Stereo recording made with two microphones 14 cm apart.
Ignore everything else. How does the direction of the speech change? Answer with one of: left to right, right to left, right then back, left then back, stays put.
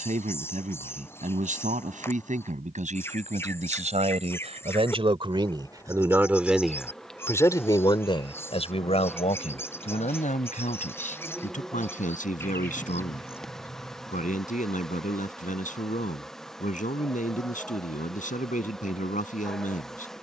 right to left.